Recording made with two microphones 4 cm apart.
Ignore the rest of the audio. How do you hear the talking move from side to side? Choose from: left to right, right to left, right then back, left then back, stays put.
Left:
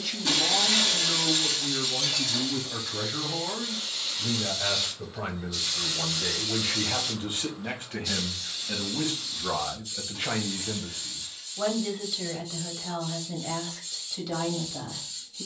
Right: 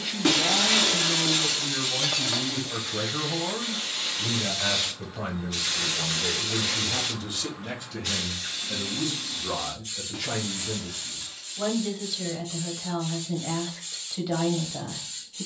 left then back.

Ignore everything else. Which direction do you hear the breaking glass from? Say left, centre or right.
right.